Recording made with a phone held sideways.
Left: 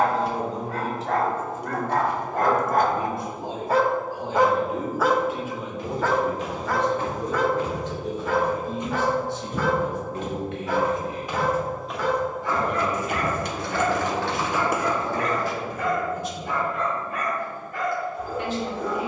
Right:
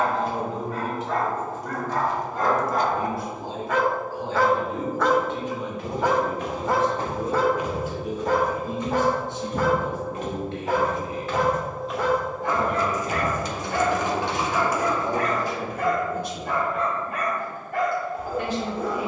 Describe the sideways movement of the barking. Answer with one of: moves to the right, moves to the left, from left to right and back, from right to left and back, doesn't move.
moves to the right.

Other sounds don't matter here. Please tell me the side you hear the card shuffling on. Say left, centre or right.
left.